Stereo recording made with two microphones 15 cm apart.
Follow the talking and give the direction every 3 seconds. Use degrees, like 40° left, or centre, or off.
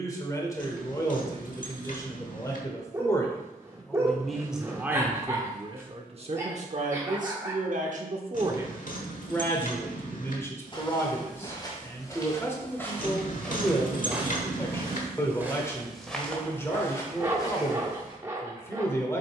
20° left, 10° right, 50° right, 20° left, 20° left, 20° left, 20° left.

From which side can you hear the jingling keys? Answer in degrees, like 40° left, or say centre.
60° left.